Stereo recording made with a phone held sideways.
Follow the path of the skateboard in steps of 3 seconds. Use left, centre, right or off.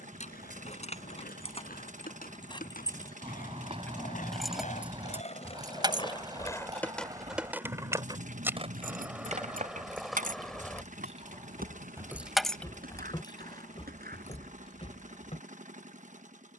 left, left, centre, right, right, off.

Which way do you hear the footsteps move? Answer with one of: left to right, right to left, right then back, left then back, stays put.
right to left.